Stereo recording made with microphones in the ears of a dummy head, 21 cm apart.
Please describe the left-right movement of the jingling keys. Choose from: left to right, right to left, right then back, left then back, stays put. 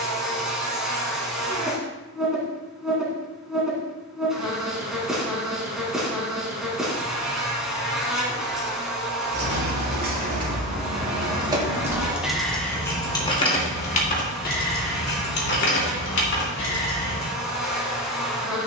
right to left.